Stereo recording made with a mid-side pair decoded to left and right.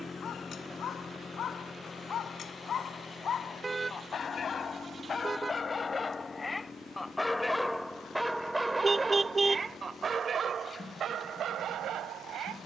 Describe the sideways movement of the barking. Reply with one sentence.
You can hear the barking travel towards the right.